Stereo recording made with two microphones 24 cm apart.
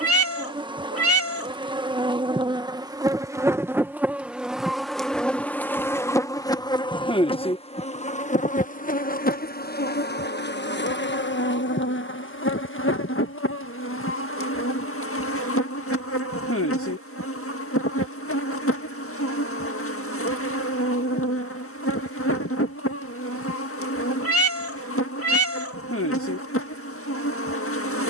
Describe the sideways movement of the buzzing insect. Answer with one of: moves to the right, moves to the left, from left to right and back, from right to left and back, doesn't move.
moves to the left.